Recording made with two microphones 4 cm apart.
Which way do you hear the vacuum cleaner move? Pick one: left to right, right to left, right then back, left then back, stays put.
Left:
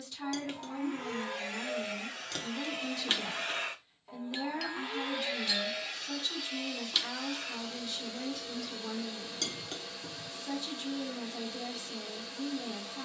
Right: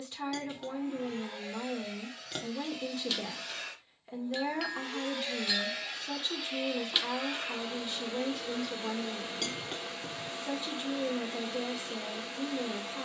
left to right.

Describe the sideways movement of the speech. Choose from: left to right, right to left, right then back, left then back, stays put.
stays put.